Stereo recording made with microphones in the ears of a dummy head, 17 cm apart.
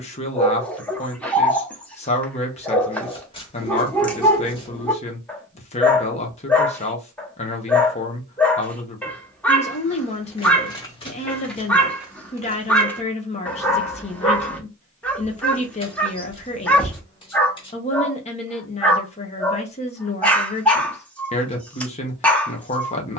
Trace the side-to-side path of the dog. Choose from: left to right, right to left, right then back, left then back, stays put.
stays put.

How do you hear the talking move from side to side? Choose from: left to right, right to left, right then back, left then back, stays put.
stays put.